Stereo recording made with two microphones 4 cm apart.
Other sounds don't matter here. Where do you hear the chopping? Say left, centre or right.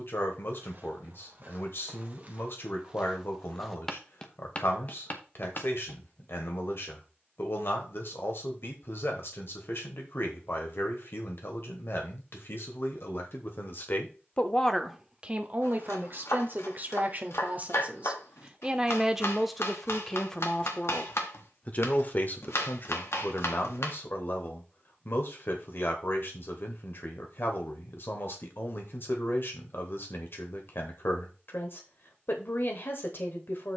left.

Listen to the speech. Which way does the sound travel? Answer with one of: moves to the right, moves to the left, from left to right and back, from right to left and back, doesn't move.
from left to right and back.